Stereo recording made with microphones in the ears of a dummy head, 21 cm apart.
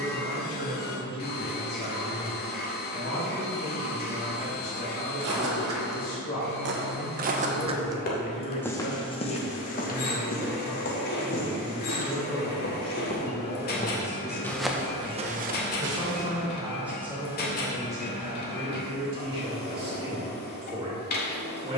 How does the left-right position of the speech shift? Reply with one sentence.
In this clip you hear the speech move from left to right.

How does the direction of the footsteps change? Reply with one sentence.
You can hear the footsteps go left and come back.